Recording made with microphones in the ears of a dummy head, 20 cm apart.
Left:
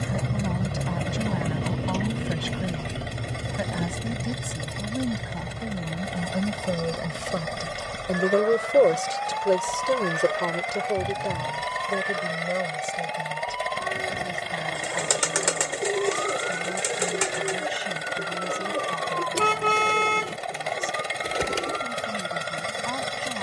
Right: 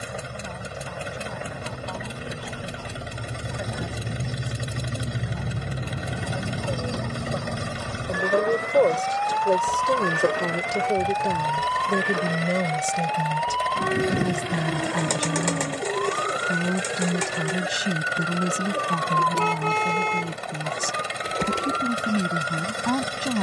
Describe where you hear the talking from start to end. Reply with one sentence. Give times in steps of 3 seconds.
You can hear the talking on the left from 0 s, in the centre from 9 s and on the right from 12 s.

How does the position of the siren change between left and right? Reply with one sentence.
You can hear the siren go from the left side to the right.